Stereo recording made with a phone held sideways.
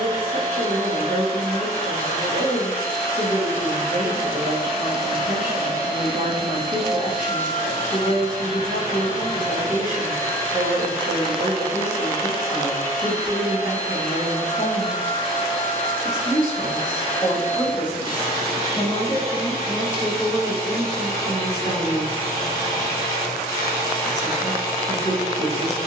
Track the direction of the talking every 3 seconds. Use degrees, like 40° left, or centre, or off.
50° right, 50° right, 50° right, 50° right, 40° right, 10° left, centre, 20° right, 50° right.